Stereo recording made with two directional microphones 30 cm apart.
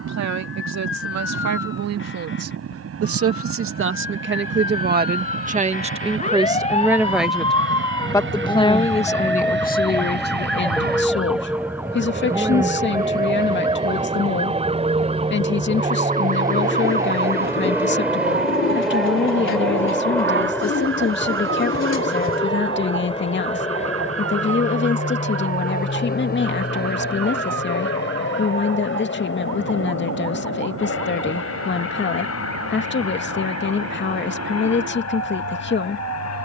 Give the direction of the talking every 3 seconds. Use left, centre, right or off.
right, right, centre, left, left, left, left, left, left, left, left, left.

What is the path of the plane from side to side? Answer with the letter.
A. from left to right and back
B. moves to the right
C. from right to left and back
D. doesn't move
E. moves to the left
E.